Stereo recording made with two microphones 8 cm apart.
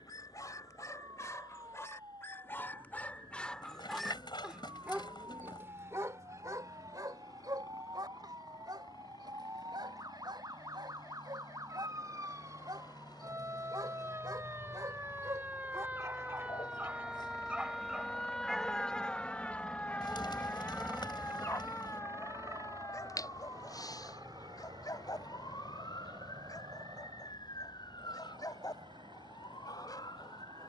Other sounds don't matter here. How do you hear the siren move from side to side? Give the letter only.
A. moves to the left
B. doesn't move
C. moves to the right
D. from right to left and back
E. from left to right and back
A.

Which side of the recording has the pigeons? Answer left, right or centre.
left.